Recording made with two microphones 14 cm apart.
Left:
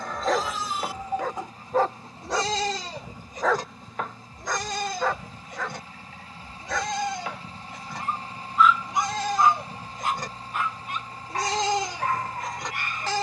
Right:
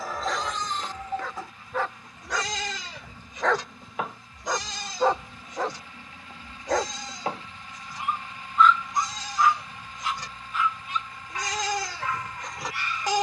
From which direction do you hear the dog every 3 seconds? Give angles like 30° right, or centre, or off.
40° left, 10° right, 30° right, 50° left, 50° left.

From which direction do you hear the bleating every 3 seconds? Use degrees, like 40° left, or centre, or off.
20° left, 50° left, 70° left, 50° left, centre.